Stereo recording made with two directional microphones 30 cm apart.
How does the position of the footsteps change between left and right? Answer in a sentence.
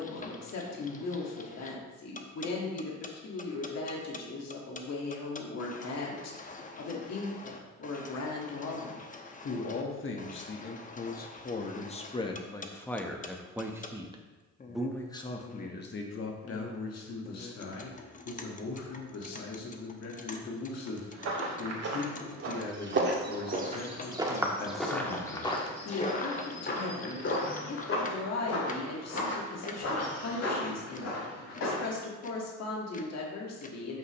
You can hear the footsteps move to the left.